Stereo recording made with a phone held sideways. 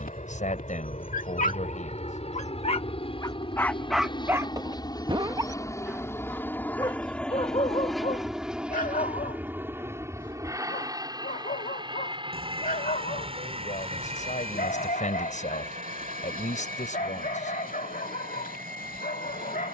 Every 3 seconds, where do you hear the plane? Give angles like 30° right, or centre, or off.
50° left, 30° left, centre, 20° right, 40° right, 50° right, 60° right.